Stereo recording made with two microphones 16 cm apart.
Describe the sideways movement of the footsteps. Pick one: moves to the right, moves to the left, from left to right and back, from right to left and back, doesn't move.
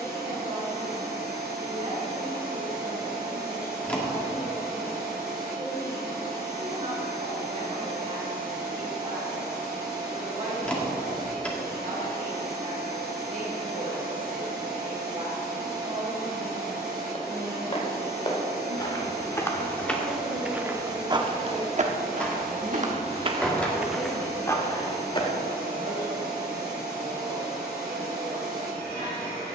from left to right and back.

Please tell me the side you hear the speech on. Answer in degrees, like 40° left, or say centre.
40° right.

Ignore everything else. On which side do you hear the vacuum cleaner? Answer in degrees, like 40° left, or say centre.
70° left.